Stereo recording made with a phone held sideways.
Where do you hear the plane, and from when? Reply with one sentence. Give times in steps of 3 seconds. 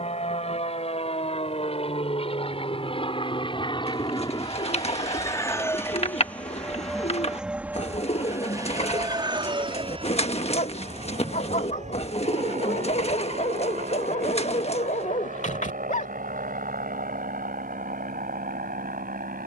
In this clip you hear the plane on the left from 0 s, in the centre from 6 s and on the right from 9 s.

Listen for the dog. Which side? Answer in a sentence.
You can hear the dog on the left.